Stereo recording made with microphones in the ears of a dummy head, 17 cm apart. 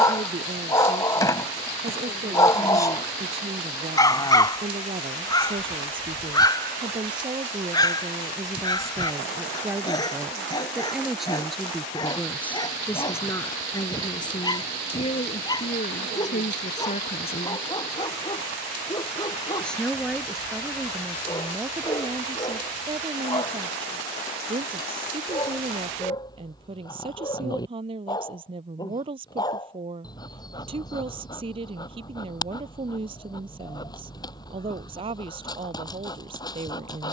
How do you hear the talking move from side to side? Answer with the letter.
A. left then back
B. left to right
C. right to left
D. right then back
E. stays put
A.